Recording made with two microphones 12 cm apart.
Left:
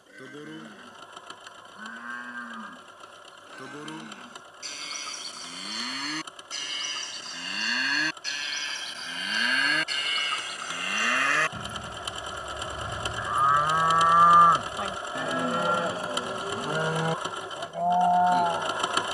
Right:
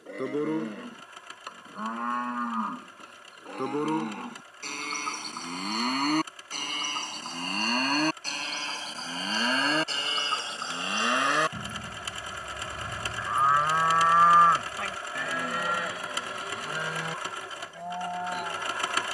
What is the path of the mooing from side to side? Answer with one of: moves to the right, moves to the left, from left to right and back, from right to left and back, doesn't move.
moves to the left.